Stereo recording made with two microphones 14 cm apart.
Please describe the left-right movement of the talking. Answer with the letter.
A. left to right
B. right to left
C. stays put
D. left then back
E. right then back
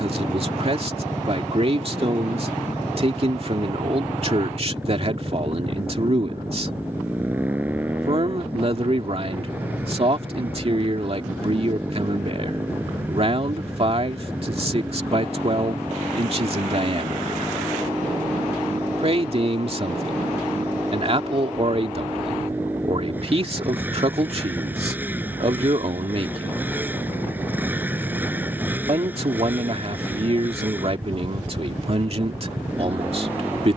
C.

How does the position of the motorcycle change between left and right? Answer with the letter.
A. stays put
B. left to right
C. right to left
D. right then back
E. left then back
A.